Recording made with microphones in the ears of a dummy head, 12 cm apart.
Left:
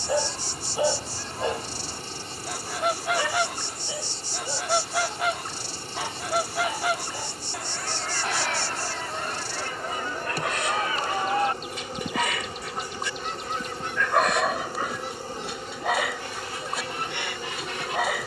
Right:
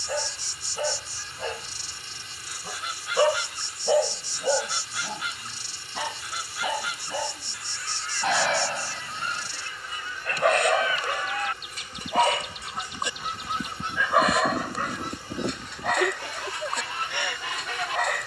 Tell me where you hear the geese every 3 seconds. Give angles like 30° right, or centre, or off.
40° left, 40° left, 40° left, 40° left, 10° right, 60° right.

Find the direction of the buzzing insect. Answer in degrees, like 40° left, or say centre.
30° left.